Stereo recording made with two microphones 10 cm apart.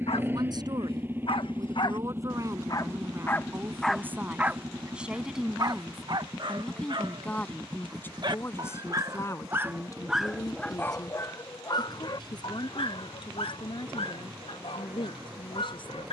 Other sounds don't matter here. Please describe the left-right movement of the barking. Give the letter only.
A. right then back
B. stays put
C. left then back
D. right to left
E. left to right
A.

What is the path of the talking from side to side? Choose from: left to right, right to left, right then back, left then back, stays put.
right to left.